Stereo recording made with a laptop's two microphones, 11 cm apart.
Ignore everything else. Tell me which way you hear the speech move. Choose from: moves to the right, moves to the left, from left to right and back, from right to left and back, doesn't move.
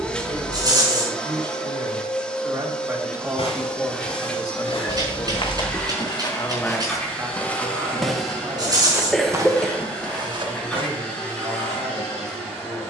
from right to left and back.